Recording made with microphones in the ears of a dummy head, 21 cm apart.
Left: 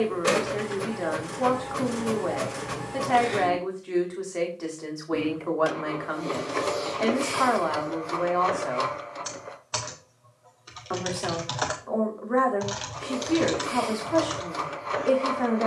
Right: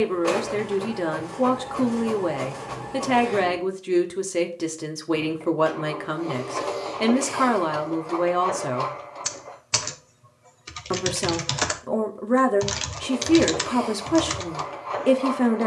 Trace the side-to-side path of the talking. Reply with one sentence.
In this clip you hear the talking stay put.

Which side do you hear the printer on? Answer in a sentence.
You can hear the printer on the left.